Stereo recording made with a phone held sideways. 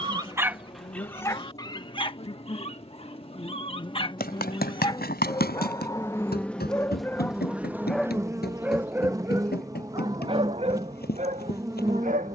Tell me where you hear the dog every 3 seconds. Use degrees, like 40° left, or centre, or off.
20° left, 30° left, 10° left, 30° right.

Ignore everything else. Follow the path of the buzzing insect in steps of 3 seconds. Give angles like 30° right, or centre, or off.
40° left, 30° left, 10° right, 20° right.